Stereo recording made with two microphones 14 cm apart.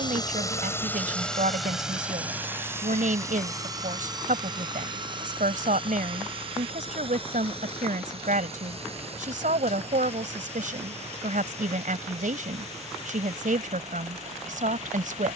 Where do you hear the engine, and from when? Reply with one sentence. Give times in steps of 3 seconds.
In this clip you hear the engine in the centre from 0 s and on the right from 3 s.